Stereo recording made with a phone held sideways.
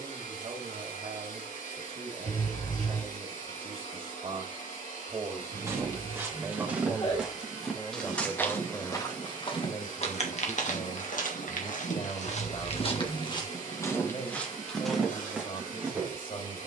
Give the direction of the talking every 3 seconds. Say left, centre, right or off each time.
right, right, centre, left, left, left.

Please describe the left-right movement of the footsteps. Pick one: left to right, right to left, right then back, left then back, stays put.
left then back.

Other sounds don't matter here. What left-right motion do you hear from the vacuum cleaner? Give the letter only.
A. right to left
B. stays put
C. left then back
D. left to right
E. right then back
B.